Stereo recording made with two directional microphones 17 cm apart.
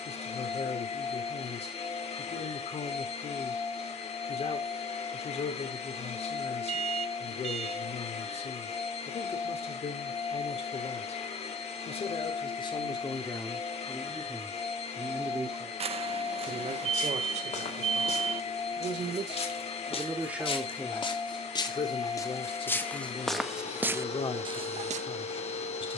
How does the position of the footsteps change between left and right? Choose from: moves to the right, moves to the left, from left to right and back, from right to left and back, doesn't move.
moves to the right.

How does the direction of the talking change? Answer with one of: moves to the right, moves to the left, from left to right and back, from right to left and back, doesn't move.
from left to right and back.